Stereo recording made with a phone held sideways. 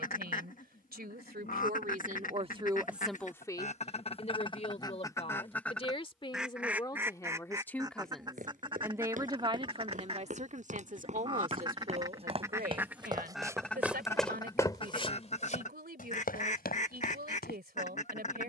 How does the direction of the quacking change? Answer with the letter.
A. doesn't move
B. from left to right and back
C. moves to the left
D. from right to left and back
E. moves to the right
B.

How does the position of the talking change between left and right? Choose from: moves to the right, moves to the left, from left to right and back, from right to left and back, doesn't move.
from right to left and back.